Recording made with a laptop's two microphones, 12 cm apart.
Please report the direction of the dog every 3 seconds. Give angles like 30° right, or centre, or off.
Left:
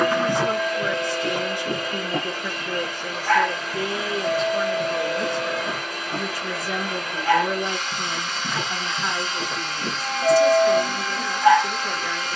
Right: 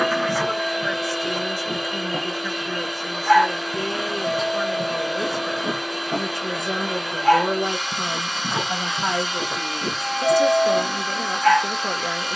20° left, 30° right, 40° right, centre.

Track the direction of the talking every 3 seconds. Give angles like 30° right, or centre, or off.
20° left, centre, 40° right, 60° right.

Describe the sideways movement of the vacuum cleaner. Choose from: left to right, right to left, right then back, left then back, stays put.
stays put.